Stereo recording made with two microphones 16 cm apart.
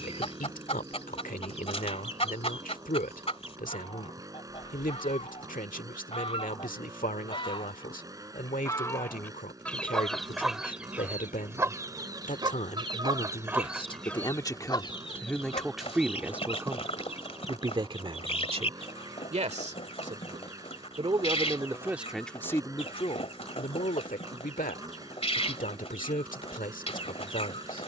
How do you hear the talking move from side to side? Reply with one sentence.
You can hear the talking move from left to right and back again.